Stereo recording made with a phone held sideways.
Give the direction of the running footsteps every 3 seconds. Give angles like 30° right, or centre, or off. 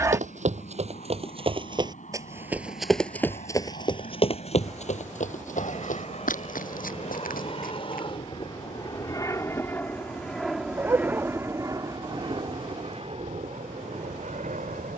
30° right, 40° left, 70° left, off, off.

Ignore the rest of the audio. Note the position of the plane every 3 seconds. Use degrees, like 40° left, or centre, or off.
70° left, 60° left, 40° left, centre, 40° right.